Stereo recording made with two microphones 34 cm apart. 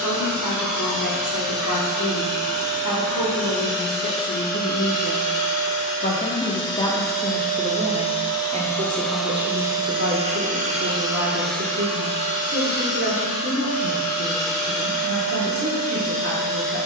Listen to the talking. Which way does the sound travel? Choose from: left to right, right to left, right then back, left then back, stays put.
left to right.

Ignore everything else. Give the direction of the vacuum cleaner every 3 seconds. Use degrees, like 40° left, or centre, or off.
60° left, 50° left, 20° left, 10° right, 40° left, 60° left.